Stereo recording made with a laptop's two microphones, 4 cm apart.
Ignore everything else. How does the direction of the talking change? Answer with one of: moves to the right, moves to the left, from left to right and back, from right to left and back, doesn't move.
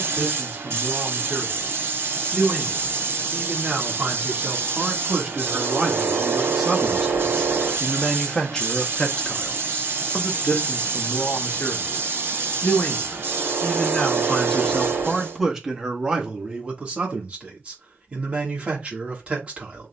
from right to left and back.